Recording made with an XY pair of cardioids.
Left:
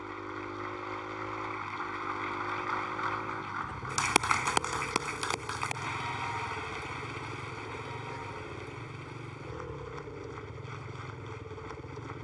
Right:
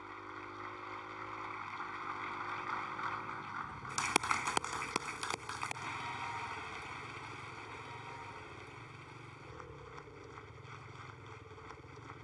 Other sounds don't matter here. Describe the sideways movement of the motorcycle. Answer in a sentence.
In this clip you hear the motorcycle stay in one place.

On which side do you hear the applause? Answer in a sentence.
You can hear the applause on the left.